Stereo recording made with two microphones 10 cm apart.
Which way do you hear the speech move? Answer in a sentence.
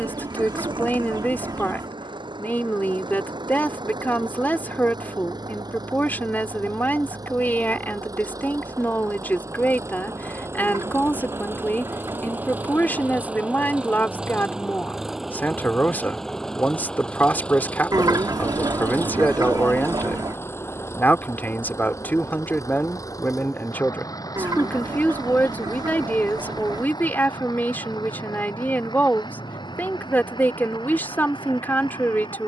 In this clip you hear the speech stay put.